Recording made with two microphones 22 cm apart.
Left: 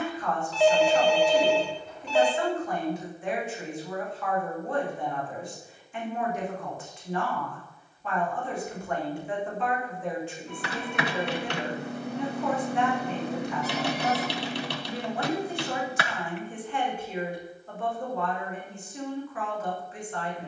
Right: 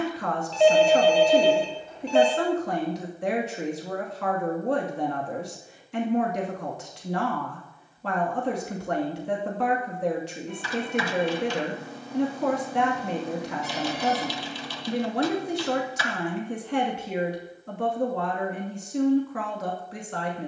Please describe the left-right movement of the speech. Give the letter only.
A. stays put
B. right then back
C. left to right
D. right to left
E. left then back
A.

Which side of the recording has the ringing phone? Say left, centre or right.
right.